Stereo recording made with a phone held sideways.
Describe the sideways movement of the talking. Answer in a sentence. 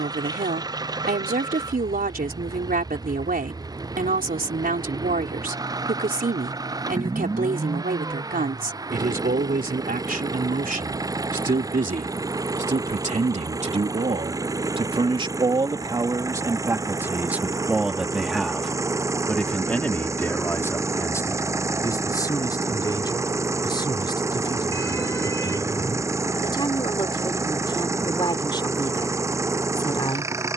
In this clip you hear the talking move from right to left.